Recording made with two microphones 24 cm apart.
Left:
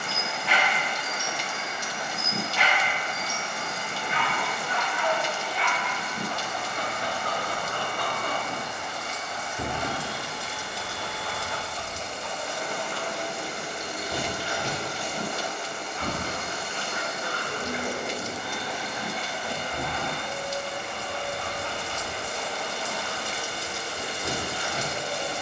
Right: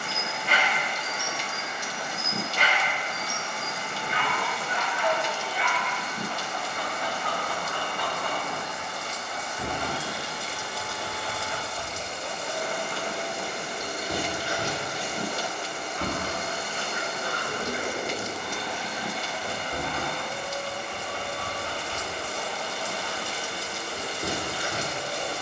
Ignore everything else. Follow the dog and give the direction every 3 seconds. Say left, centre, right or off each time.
right, right, left, centre, right, right, right, right, right.